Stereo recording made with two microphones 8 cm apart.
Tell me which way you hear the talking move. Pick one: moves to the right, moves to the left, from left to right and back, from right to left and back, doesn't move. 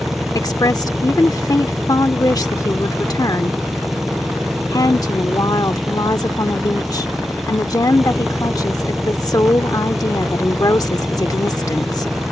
doesn't move.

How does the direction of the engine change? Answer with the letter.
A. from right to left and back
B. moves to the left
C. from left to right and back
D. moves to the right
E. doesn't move
E.